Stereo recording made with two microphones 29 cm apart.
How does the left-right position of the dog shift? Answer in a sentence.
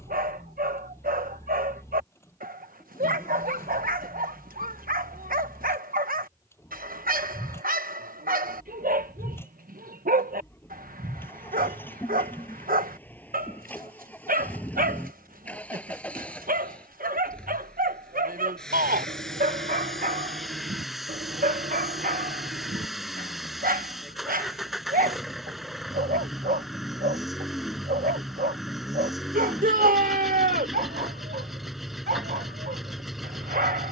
You can hear the dog stay put.